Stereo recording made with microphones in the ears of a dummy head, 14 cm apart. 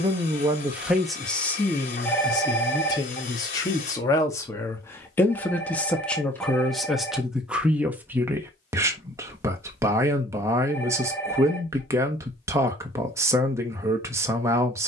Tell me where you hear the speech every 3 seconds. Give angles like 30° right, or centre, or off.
10° left, 20° left, 10° right, 20° right, 20° right.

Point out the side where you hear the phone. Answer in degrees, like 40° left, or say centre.
10° left.